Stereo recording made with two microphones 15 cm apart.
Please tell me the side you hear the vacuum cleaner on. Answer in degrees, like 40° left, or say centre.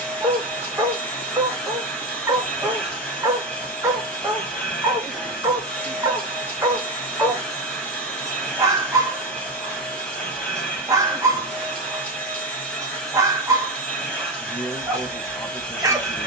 10° left.